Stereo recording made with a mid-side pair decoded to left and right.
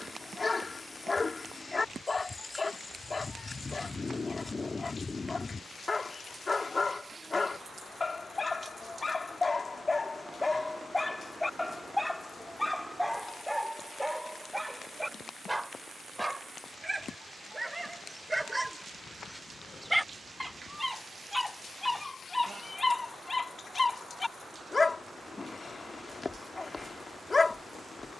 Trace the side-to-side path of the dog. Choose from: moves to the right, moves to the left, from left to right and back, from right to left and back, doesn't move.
from left to right and back.